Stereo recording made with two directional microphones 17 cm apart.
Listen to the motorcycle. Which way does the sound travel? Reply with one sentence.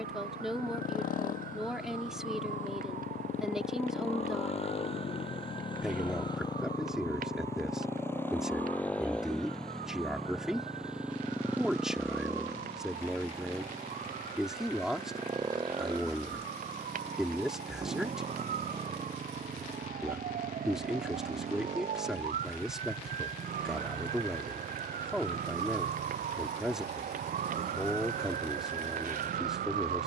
You can hear the motorcycle go from the left side to the right.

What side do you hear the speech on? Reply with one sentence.
In this clip you hear the speech in the centre.